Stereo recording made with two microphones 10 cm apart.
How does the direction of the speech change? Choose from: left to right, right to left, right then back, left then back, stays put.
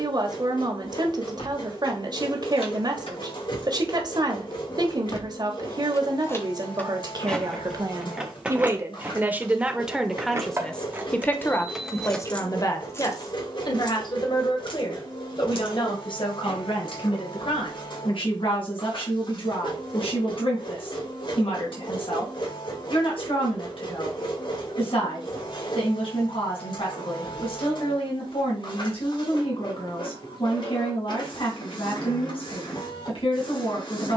right to left.